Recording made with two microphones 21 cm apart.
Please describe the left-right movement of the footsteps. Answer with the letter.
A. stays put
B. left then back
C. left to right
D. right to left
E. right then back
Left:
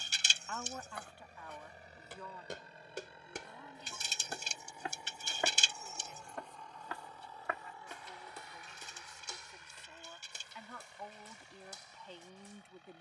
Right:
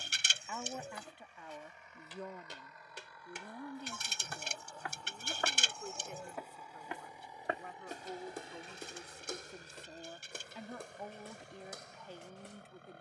C.